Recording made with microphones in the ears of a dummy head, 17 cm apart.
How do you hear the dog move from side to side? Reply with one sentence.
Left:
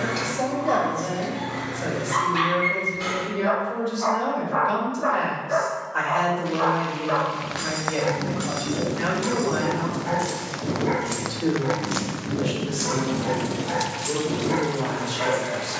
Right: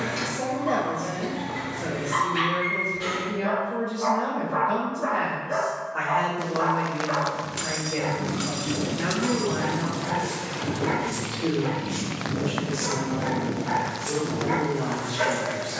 You can hear the dog go from the left side to the right.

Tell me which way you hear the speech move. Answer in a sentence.
In this clip you hear the speech stay in one place.